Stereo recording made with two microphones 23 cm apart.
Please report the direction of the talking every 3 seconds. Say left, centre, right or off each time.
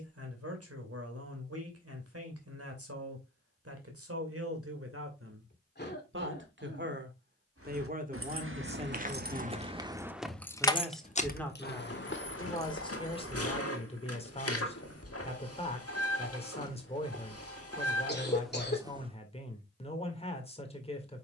right, right, right, centre, left, left, left.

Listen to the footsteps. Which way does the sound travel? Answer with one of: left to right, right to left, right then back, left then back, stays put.
left then back.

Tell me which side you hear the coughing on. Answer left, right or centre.
left.